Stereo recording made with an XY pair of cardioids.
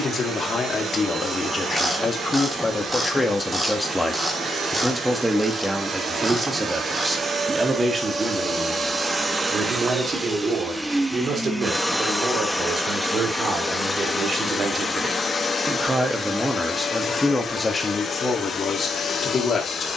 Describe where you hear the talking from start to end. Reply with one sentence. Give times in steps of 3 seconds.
You can hear the talking on the left from 0 s, in the centre from 3 s, on the right from 6 s, in the centre from 15 s and on the left from 18 s.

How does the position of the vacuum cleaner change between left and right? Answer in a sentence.
In this clip you hear the vacuum cleaner go from the right side to the left.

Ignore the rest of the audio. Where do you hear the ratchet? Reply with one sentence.
In this clip you hear the ratchet in the centre.